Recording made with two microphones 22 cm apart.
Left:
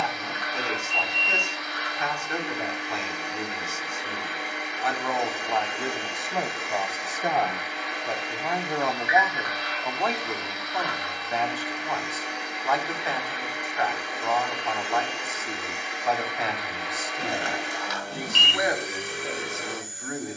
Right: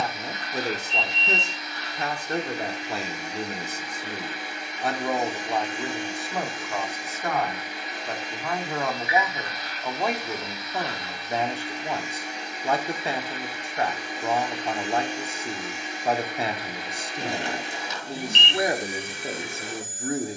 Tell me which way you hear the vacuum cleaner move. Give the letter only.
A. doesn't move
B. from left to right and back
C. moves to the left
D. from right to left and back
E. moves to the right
A.